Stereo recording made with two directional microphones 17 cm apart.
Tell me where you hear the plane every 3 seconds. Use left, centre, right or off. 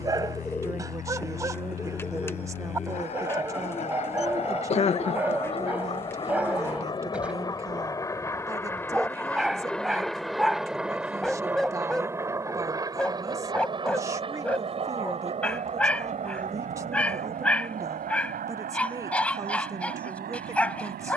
left, left, left, centre, right, right, right.